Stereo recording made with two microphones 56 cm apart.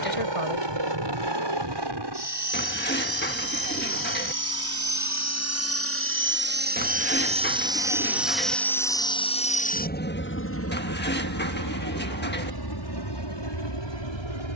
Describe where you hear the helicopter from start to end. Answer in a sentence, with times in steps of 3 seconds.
You can hear the helicopter on the right from 0 s, in the centre from 6 s and on the left from 9 s.